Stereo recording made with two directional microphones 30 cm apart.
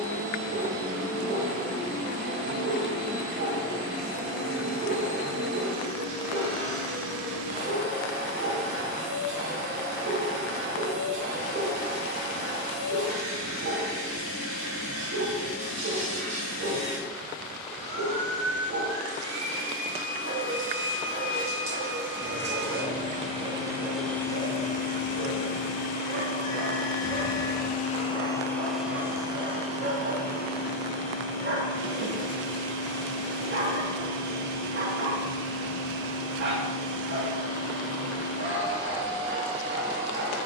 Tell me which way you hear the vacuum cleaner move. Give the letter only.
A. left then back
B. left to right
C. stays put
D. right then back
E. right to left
A.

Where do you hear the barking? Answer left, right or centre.
right.